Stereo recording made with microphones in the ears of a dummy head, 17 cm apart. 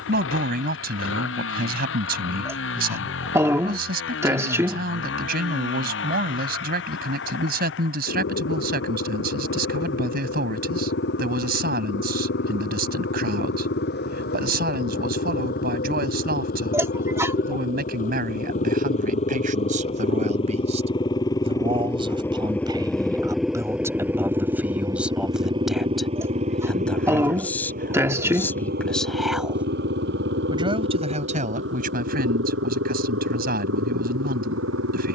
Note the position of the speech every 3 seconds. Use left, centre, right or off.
right, right, right, right, right, right, right, right, centre, centre, right, right.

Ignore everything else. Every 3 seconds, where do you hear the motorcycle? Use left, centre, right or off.
left, left, left, left, left, left, left, centre, right, right, right, right.